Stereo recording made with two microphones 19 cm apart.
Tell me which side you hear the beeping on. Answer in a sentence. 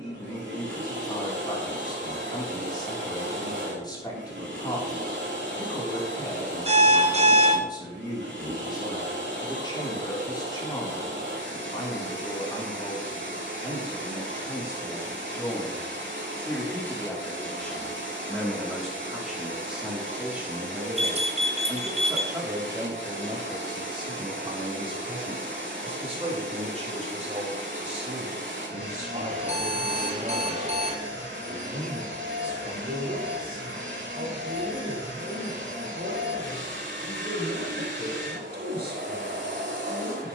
You can hear the beeping on the right.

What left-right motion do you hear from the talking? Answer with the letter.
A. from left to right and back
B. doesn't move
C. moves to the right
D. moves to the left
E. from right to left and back
C.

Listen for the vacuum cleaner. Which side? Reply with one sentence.
In this clip you hear the vacuum cleaner on the right.